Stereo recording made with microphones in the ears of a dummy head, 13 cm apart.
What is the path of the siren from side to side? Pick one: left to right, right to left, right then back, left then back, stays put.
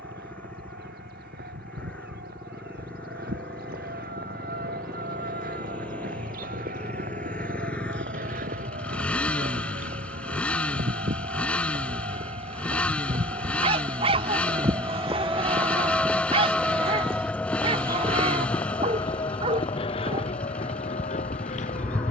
right to left.